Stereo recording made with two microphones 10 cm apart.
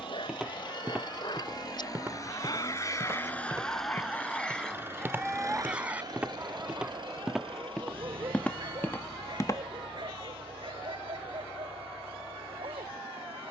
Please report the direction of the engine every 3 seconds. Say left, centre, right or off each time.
left, centre, right, right, right.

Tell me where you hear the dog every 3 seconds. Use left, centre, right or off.
left, centre, right, right, right.